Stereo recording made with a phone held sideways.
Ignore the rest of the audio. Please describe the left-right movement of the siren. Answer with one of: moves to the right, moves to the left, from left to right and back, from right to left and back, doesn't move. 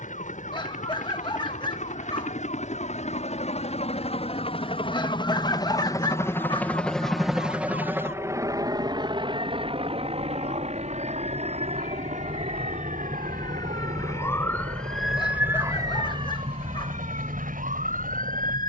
moves to the right.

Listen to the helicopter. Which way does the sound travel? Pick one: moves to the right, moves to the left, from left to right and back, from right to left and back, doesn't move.
moves to the right.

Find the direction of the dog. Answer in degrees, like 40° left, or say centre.
30° left.